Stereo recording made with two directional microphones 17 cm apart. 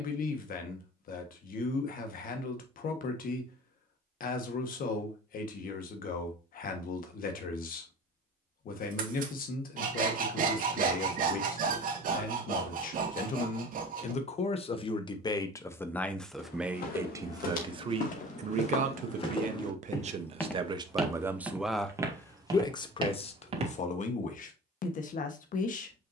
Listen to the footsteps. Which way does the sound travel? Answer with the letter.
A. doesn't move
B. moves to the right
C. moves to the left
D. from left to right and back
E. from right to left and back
B.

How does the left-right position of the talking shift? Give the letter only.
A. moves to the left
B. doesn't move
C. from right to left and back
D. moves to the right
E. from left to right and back
E.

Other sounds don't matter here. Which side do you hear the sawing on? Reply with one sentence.
In this clip you hear the sawing on the right.